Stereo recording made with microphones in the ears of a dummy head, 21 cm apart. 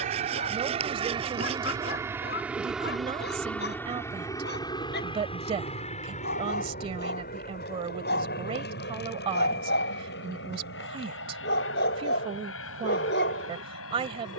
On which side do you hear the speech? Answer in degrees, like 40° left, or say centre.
30° right.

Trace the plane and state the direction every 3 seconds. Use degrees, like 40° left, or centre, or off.
20° right, 10° left, 40° left, 50° left, 60° left.